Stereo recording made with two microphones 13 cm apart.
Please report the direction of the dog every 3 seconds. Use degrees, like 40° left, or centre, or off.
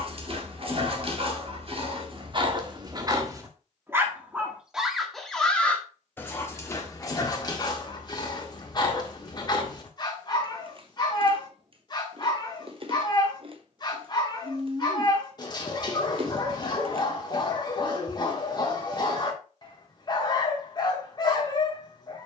40° right, 10° right, 30° left, 30° left, 30° left, 30° left, 30° left, 30° left.